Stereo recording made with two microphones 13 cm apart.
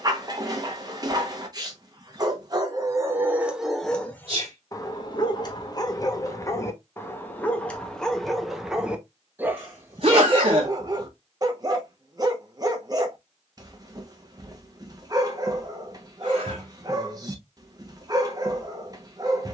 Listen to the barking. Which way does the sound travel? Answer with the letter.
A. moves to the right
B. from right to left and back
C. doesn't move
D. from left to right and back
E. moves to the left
B.